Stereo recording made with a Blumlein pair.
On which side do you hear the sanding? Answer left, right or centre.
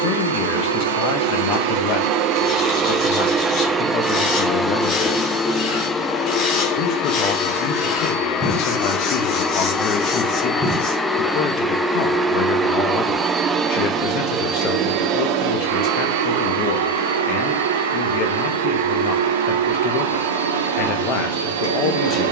left.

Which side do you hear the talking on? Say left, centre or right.
left.